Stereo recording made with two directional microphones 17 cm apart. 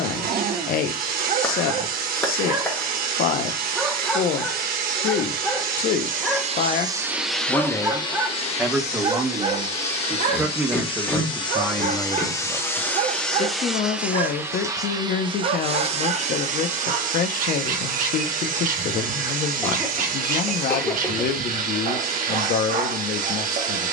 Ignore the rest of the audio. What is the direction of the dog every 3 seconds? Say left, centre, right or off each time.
right, centre, centre, right, right, right, right, right.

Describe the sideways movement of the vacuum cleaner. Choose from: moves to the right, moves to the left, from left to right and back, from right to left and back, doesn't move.
from right to left and back.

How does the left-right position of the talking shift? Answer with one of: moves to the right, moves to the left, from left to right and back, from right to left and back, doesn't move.
from left to right and back.